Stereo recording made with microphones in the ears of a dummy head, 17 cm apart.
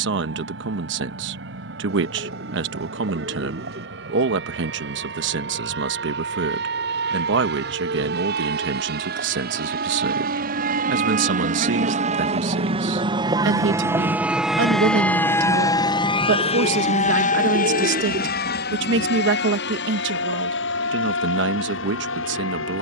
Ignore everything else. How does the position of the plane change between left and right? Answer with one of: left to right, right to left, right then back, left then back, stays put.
right to left.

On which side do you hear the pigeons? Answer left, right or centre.
right.